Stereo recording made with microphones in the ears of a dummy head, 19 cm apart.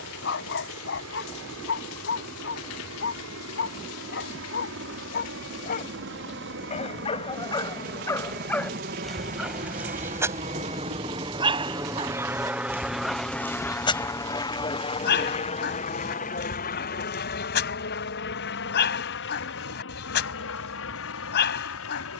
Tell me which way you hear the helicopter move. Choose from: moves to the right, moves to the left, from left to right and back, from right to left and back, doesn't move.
moves to the left.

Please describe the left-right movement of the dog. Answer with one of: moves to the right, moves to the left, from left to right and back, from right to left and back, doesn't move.
from left to right and back.